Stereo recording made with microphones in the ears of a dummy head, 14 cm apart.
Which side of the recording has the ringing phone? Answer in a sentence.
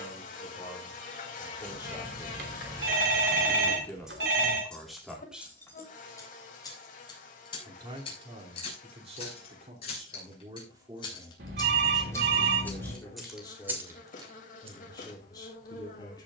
In this clip you hear the ringing phone on the right.